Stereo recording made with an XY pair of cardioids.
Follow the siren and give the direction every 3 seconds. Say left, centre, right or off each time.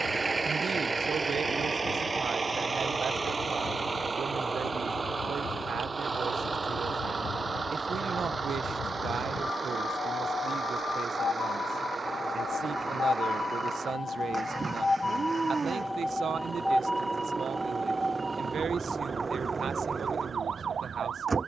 left, left, left, left, left, centre, right.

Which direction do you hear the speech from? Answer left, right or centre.
right.